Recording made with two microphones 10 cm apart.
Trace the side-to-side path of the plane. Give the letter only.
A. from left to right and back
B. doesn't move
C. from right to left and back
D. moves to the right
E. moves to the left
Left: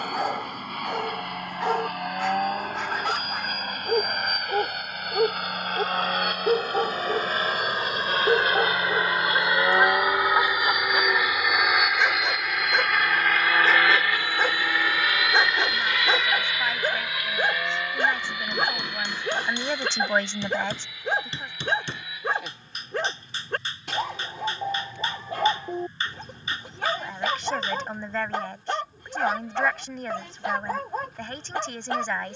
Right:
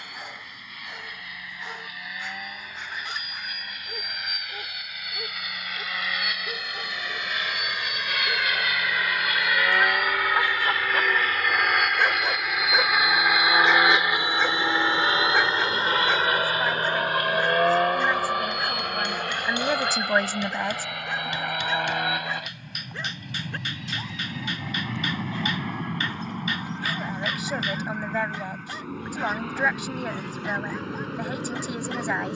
D.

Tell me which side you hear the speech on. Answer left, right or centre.
centre.